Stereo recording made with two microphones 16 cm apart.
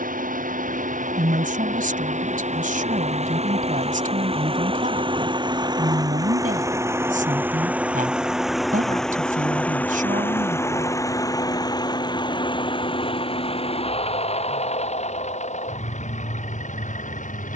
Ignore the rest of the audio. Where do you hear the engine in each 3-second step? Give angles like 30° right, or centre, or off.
50° right, 30° right, 10° right, 10° left, 30° left, 50° left.